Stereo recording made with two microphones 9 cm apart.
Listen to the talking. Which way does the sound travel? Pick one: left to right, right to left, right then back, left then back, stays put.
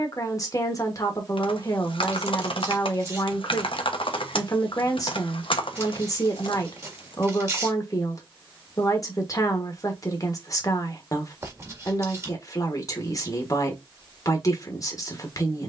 stays put.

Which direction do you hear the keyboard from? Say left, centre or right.
left.